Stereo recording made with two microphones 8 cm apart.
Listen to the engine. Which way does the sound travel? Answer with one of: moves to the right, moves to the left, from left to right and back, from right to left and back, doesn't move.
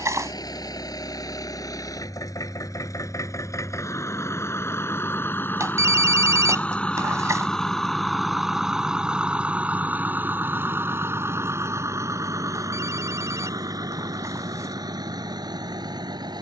moves to the right.